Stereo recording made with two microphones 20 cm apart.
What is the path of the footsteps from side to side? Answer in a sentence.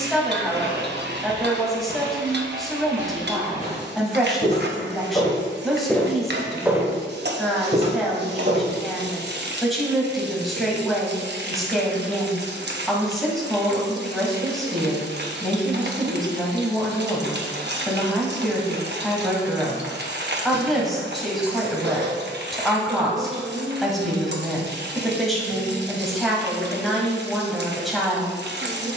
In this clip you hear the footsteps move from left to right.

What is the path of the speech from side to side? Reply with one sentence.
You can hear the speech stay put.